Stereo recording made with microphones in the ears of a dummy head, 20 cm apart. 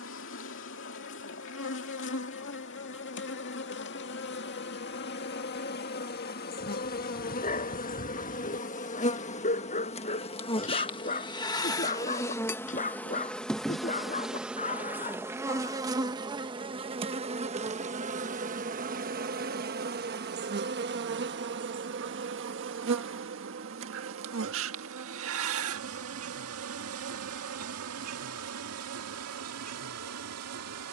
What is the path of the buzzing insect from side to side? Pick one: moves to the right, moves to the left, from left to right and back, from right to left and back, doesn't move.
moves to the right.